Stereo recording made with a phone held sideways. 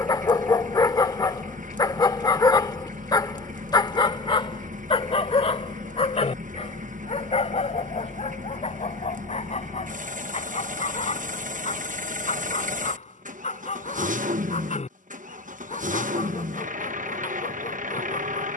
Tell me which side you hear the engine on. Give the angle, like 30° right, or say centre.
60° right.